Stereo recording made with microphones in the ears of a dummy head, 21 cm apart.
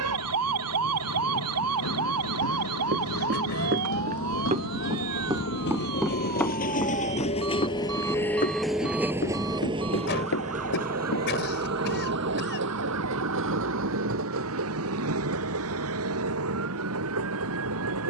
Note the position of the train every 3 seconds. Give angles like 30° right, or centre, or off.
70° left, 60° left, 20° left, 30° right, 60° right, 70° right.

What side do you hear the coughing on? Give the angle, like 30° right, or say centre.
50° left.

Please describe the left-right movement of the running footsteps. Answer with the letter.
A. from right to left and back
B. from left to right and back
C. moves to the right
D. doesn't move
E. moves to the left
E.